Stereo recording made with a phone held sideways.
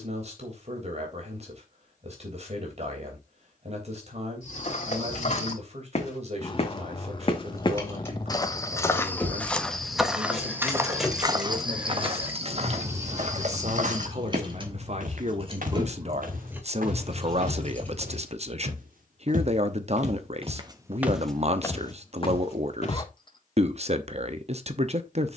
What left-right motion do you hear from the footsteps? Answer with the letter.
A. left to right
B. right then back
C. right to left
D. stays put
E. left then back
B.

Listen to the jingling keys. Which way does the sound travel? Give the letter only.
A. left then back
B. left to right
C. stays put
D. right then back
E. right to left
D.